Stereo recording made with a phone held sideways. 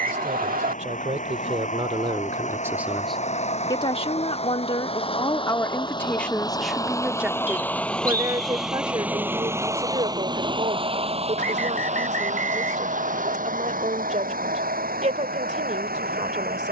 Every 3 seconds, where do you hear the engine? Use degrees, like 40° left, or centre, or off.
50° left, 40° left, 10° left, 30° right, 60° right, 70° right.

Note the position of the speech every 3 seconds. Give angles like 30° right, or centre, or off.
40° right, 30° left, 10° right, 40° right, 50° right, 50° right.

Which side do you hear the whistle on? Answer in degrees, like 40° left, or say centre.
70° right.